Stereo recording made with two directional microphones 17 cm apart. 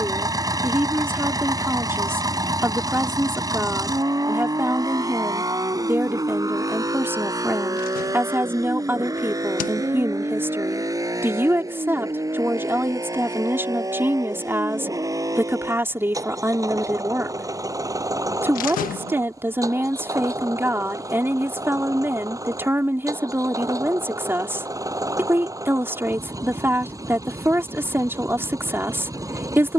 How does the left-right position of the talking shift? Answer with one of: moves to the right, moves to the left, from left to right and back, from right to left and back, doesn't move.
doesn't move.